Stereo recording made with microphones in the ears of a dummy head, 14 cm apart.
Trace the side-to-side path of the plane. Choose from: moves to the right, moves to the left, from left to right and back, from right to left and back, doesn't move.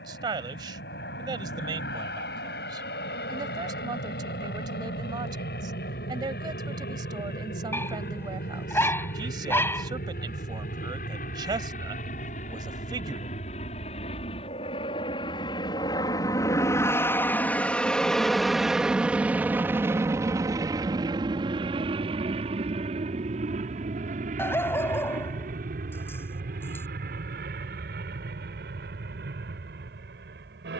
moves to the right.